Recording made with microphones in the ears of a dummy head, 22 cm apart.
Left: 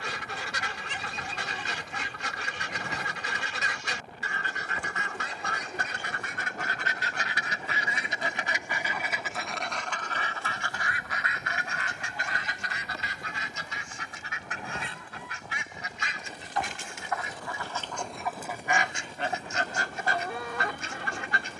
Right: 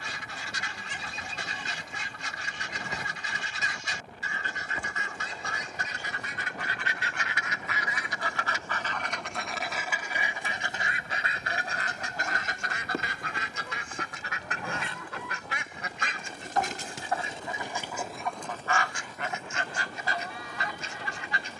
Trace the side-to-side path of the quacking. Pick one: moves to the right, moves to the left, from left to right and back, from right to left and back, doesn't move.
from left to right and back.